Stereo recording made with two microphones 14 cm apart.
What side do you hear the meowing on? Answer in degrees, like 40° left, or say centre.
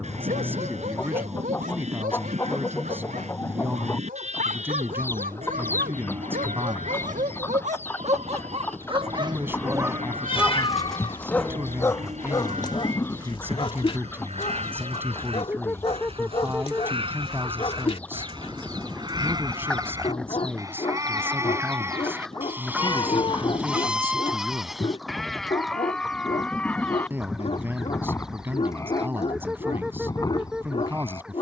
40° left.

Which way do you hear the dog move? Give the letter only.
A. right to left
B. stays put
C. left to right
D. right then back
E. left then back
A.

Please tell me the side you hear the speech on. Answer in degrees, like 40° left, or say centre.
20° right.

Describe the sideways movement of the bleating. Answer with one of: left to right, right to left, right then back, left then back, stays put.
right to left.